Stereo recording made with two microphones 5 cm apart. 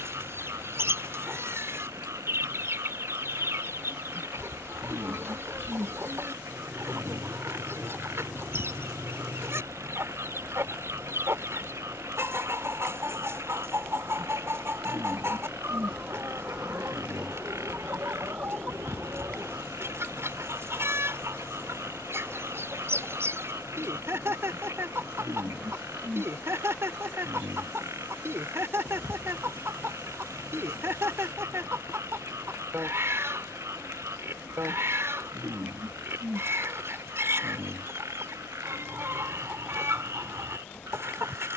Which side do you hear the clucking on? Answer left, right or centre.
right.